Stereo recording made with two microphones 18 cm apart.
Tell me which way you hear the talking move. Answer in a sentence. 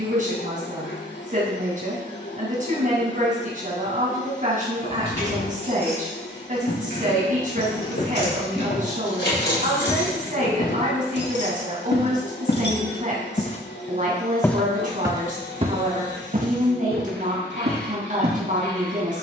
In this clip you hear the talking stay put.